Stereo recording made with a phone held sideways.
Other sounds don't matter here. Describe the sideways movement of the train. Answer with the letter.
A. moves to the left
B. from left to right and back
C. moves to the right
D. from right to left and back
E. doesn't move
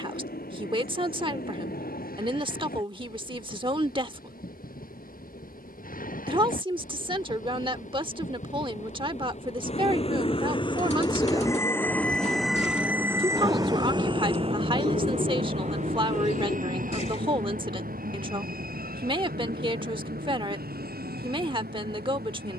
C.